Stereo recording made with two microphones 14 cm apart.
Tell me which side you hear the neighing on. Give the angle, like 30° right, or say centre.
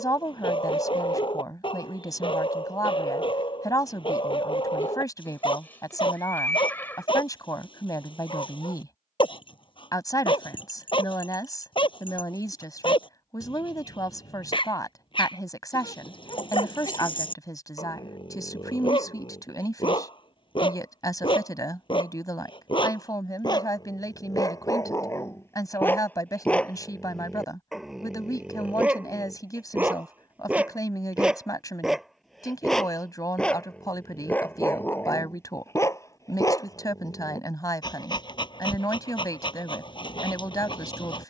20° left.